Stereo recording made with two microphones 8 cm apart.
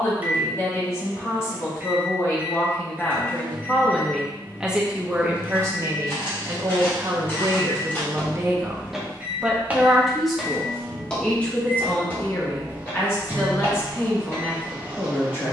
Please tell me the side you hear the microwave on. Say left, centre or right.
right.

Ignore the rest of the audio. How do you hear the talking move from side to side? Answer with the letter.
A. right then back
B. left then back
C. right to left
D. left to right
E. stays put
A.